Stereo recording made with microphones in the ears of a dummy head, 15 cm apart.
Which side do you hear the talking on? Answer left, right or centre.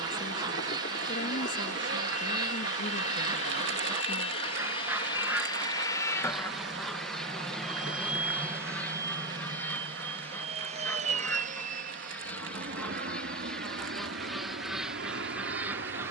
left.